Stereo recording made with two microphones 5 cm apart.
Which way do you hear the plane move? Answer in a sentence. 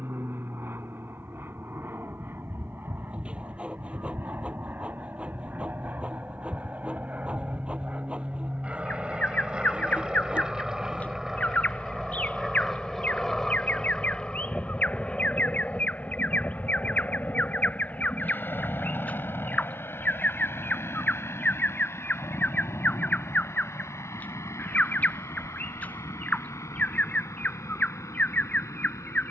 You can hear the plane go from the right side to the left.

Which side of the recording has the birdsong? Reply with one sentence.
In this clip you hear the birdsong on the left.